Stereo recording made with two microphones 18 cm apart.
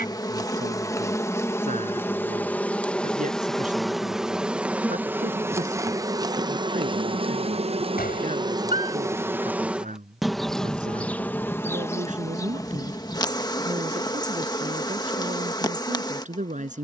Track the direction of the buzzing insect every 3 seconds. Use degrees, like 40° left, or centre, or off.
10° left, 10° right, 30° right, centre, 20° left, 20° left.